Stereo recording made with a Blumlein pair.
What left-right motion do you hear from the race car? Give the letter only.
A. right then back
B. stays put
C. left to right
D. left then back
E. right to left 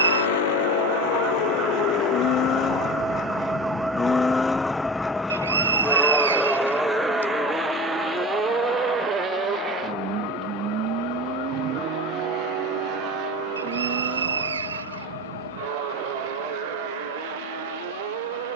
C.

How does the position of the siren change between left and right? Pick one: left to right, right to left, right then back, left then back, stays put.
right to left.